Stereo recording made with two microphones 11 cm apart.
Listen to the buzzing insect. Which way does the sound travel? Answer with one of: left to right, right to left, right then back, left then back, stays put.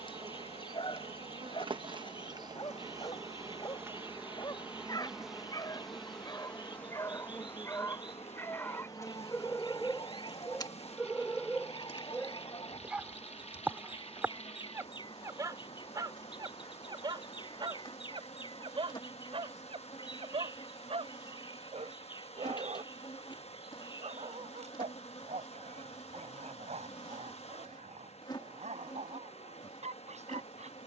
right to left.